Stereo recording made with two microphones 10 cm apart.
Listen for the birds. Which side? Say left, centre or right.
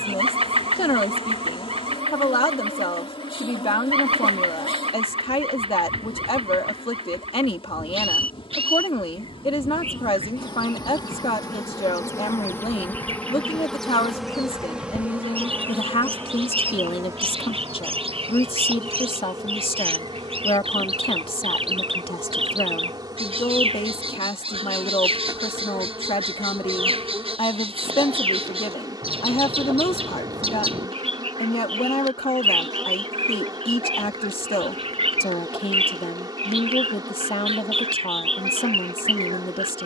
right.